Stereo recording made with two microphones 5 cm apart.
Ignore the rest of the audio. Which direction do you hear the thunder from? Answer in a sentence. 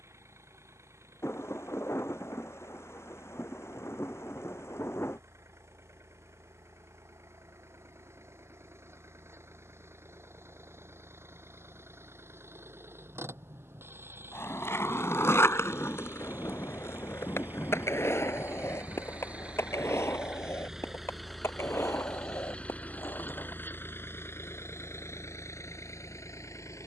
In this clip you hear the thunder on the left.